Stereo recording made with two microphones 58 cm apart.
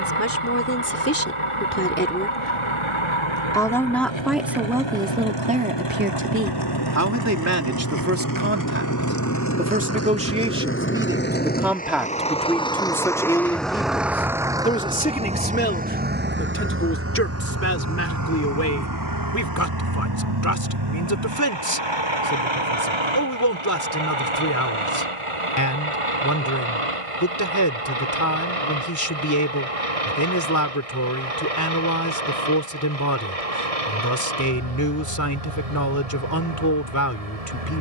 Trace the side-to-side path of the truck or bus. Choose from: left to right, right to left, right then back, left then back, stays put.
left to right.